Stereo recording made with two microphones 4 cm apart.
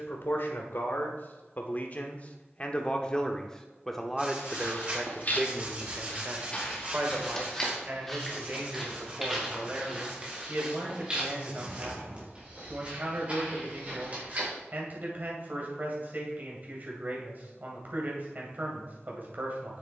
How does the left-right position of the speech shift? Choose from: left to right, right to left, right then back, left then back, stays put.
left to right.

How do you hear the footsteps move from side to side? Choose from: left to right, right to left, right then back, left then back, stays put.
left to right.